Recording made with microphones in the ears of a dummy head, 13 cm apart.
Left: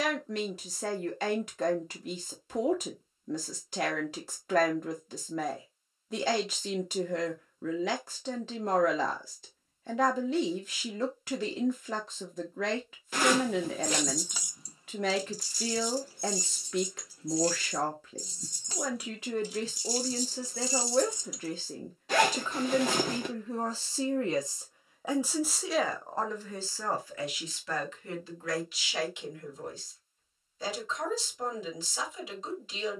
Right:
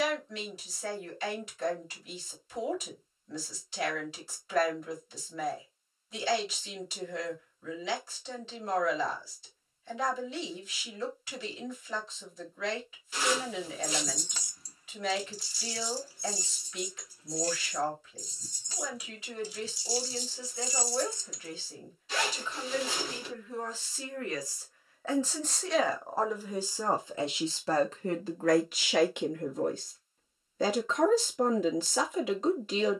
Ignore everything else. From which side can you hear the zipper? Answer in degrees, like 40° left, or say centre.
40° left.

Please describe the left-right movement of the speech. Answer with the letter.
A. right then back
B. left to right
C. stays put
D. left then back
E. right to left
B.